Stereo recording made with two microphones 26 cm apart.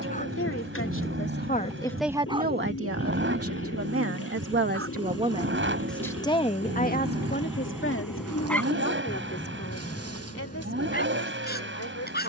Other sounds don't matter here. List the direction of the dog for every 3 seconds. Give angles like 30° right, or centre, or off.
centre, 50° right, 10° right, 30° left.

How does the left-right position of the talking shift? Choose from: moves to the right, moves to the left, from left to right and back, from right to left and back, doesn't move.
from left to right and back.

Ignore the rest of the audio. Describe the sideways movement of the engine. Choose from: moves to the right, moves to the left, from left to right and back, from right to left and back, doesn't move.
doesn't move.